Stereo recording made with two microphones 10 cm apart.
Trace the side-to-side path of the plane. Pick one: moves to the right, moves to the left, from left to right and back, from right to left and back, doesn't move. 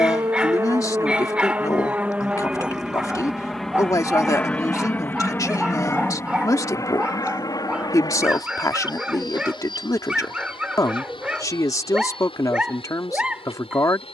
moves to the left.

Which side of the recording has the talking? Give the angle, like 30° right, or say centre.
30° left.